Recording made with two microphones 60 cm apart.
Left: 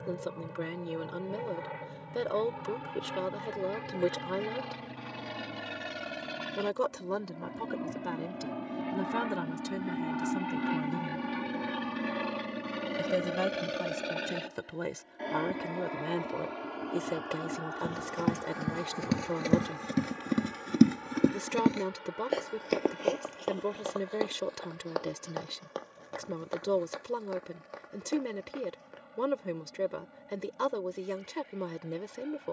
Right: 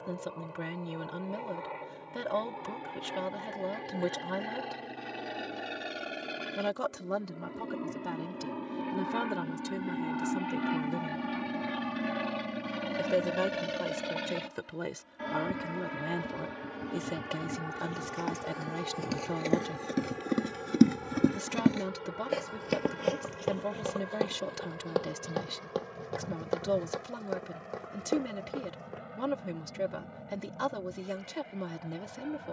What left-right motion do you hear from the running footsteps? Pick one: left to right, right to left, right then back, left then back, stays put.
left to right.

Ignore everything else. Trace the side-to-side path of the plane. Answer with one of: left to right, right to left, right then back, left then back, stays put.
left to right.